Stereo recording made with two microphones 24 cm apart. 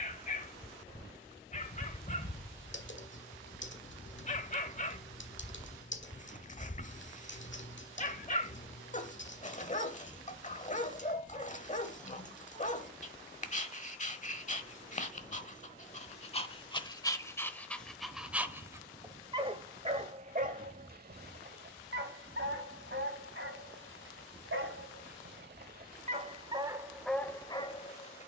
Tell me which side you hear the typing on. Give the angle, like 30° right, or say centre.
60° left.